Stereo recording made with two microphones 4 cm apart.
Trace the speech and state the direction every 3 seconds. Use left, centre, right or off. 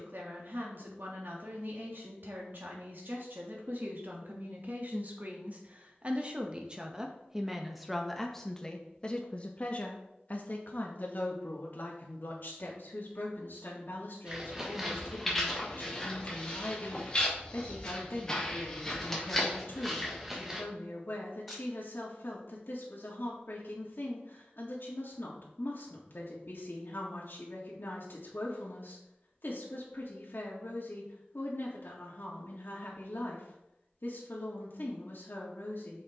right, right, centre, left, left, left, left, left, left, left, left, left.